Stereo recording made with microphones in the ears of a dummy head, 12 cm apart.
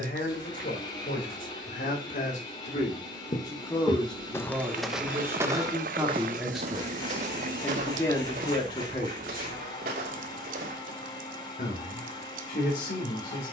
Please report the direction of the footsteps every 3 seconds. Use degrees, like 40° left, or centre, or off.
off, centre, 50° right, 70° right, off.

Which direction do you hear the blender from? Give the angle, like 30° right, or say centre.
30° left.